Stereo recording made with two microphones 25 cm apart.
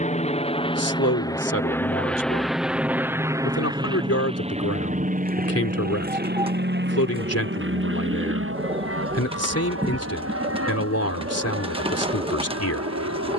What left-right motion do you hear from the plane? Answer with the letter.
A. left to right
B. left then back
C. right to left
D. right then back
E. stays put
A.